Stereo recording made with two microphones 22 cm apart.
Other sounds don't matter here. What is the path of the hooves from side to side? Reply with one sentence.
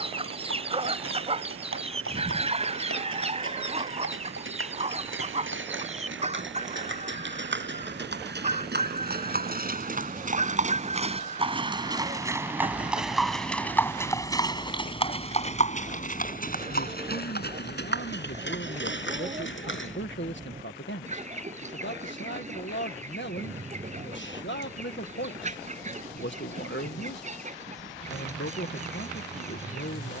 In this clip you hear the hooves travel towards the left.